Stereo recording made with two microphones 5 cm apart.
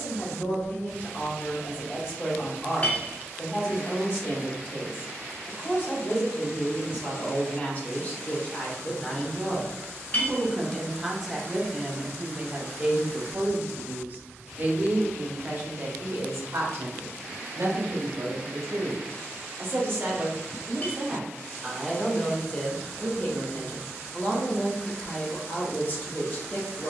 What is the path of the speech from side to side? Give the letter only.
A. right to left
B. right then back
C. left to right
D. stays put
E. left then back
B.